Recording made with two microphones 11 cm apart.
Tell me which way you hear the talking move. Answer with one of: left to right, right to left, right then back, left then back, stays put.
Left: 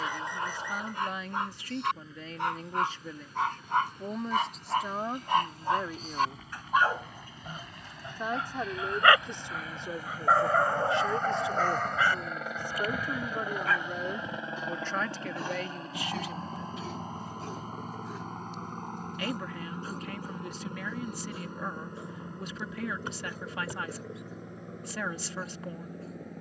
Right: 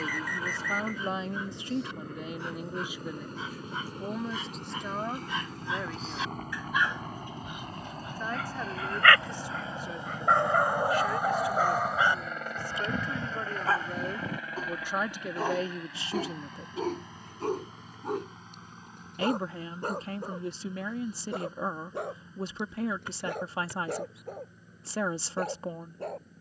left then back.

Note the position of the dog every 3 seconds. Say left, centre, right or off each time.
left, left, left, centre, right, right, right, right, right.